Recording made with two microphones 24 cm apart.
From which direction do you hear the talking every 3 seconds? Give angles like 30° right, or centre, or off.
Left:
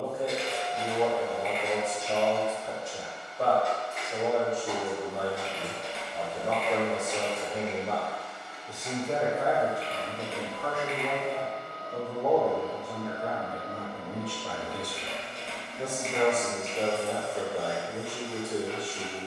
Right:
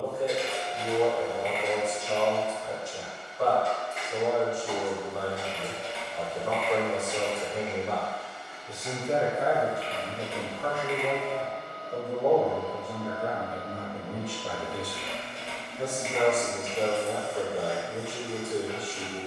20° left, 20° left, 20° left, 30° right, 30° right, 10° left, 20° left.